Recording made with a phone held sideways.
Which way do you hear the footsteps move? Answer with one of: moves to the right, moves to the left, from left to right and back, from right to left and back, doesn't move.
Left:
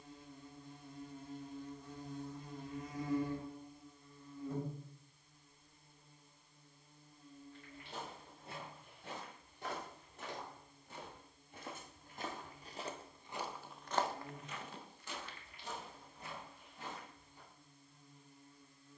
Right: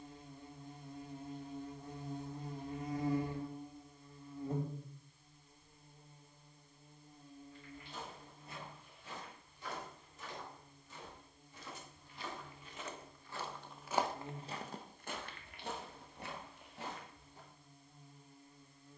moves to the right.